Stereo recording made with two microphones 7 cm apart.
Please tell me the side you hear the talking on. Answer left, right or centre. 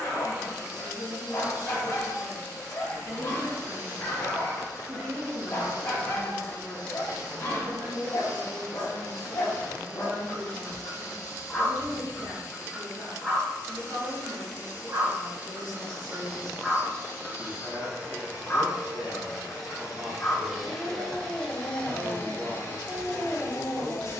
right.